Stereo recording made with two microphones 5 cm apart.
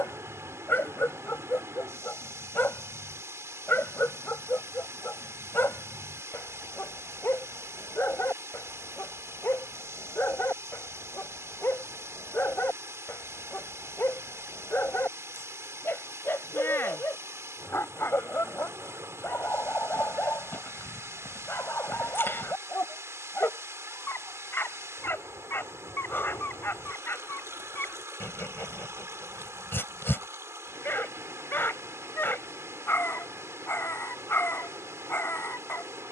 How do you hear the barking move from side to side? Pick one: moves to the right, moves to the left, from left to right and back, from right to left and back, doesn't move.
doesn't move.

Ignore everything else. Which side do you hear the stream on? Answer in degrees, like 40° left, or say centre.
70° right.